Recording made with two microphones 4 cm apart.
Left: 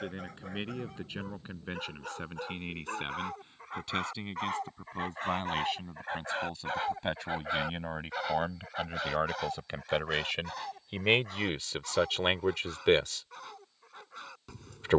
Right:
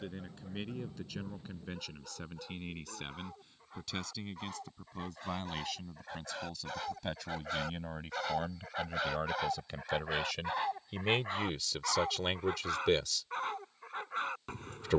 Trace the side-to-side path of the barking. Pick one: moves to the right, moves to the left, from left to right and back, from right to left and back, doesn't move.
moves to the right.